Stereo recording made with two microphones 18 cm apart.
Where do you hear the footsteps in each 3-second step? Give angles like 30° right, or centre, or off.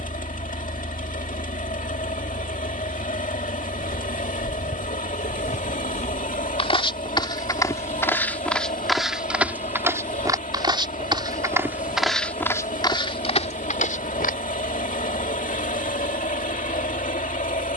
off, 50° left, 20° left, 10° right, 30° left, off.